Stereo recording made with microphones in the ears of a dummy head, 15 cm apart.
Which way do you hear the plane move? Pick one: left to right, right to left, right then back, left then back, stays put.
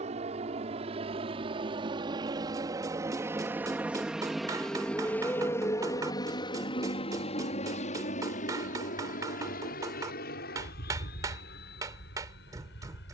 right to left.